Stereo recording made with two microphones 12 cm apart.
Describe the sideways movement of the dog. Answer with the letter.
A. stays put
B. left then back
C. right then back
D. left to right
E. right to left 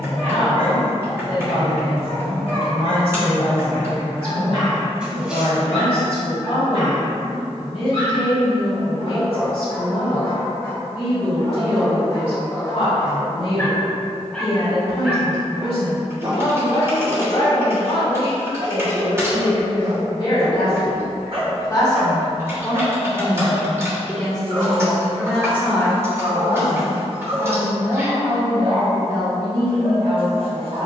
D.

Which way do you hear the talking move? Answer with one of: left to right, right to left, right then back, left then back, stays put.
left to right.